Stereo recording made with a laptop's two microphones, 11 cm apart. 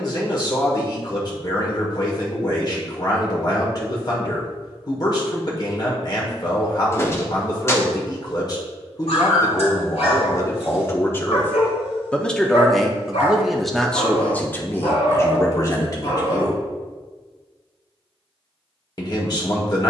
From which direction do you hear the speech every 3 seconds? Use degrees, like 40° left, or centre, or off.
40° left, 40° left, 40° left, 30° left, 10° left, 30° left, 40° left.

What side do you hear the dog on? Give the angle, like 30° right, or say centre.
80° left.